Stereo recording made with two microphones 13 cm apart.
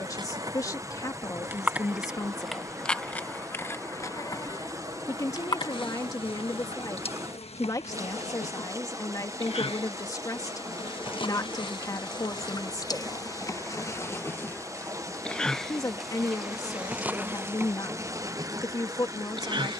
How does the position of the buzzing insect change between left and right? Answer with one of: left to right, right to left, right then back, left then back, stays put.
left then back.